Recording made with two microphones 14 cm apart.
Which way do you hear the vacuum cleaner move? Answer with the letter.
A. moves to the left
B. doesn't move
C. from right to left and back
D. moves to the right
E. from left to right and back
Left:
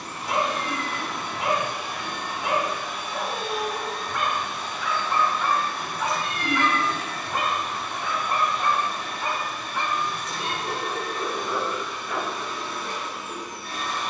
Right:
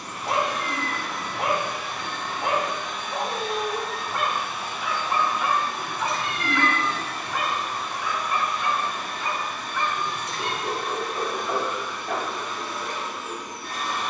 D.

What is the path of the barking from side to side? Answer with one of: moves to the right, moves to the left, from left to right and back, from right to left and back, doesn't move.
from right to left and back.